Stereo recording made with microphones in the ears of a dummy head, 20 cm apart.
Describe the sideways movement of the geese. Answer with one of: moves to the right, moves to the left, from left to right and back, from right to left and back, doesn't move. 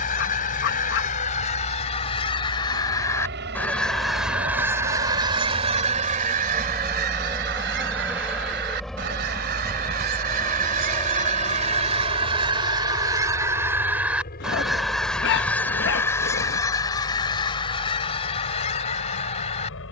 from left to right and back.